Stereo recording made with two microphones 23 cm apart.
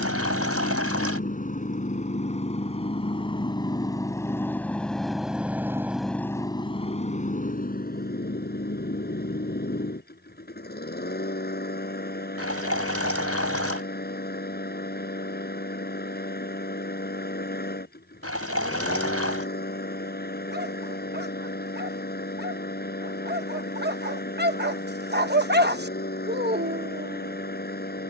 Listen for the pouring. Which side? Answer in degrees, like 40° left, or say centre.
80° right.